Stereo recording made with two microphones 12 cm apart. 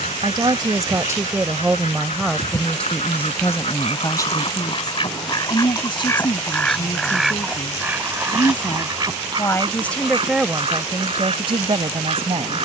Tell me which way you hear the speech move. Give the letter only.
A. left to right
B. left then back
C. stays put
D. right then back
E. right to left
B.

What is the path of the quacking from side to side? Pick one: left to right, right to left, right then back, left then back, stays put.
left to right.